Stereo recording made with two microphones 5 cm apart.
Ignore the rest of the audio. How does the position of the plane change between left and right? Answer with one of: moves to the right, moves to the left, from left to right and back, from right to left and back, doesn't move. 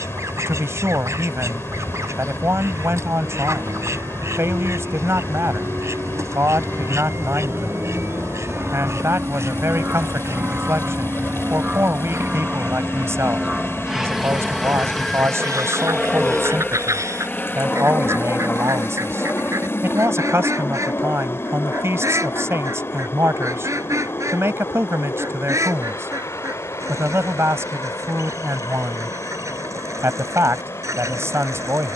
moves to the left.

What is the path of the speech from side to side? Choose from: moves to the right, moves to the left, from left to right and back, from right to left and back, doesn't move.
doesn't move.